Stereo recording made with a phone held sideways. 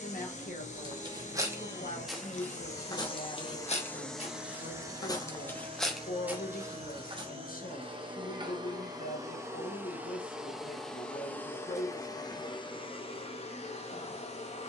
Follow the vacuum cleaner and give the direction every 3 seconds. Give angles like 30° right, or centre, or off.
60° left, 10° right, 40° right, centre, 40° left.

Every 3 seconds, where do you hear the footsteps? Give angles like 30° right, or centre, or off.
10° right, 30° left, 20° right, off, off.